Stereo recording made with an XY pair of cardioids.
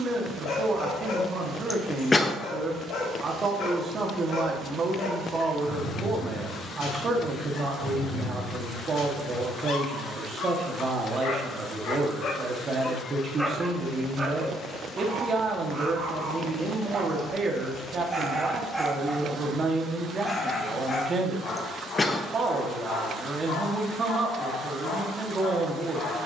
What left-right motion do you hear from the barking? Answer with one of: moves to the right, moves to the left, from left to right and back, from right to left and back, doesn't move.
from left to right and back.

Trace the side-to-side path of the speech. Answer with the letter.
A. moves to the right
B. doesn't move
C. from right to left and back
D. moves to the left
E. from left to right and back
B.